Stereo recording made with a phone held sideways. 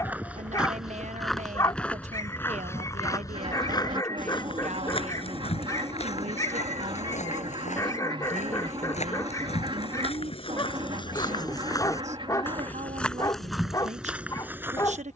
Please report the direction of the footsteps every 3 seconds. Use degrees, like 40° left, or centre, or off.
centre, 40° left, 60° left, 40° left, centre.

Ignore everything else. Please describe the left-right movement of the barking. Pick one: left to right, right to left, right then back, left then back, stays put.
stays put.